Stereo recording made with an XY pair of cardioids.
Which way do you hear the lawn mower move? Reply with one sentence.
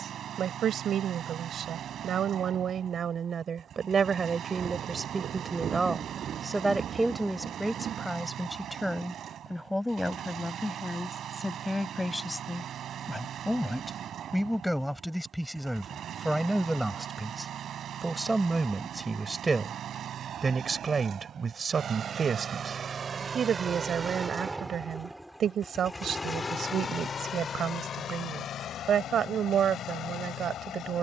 In this clip you hear the lawn mower move from right to left.